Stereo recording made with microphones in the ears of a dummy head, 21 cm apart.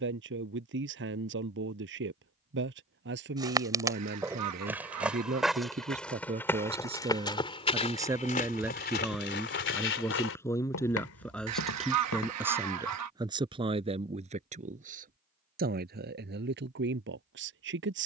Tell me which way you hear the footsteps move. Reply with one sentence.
You can hear the footsteps move from right to left.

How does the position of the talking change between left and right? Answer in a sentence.
In this clip you hear the talking move from right to left and back again.